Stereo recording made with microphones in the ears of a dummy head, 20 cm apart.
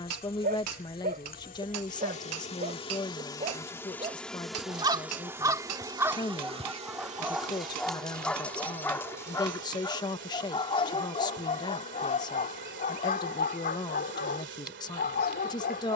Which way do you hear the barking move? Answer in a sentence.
You can hear the barking move to the left.